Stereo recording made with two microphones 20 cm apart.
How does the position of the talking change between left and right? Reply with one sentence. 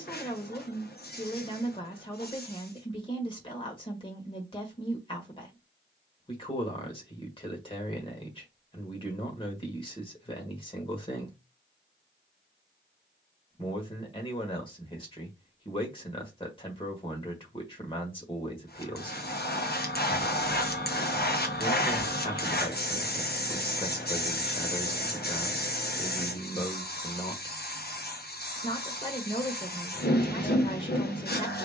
You can hear the talking stay put.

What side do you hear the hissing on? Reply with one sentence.
You can hear the hissing on the left.